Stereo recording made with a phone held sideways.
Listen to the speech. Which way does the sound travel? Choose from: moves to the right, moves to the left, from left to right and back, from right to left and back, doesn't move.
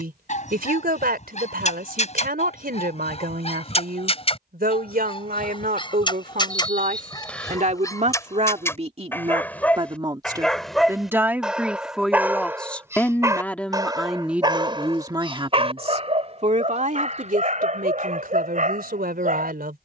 from right to left and back.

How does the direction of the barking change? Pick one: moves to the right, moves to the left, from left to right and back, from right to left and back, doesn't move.
moves to the right.